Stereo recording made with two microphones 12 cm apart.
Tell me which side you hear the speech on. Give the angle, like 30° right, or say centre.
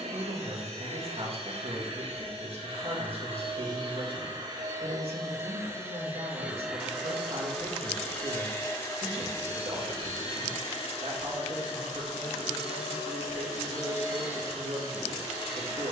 60° right.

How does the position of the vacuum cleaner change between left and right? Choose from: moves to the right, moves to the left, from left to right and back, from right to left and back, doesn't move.
moves to the left.